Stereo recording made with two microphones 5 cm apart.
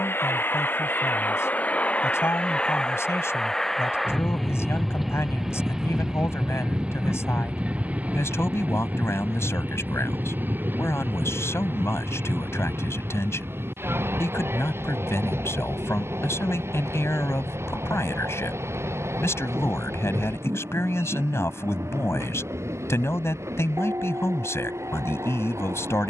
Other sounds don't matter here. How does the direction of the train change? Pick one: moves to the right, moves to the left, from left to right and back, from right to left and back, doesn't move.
moves to the right.